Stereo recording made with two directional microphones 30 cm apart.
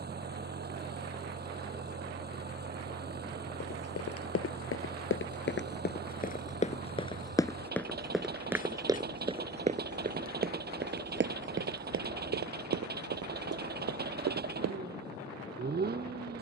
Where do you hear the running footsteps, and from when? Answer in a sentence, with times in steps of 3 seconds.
In this clip you hear the running footsteps not at all from 0 s, on the left from 3 s, in the centre from 6 s, on the right from 9 s and not at all from 15 s.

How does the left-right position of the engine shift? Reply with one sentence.
You can hear the engine stay in one place.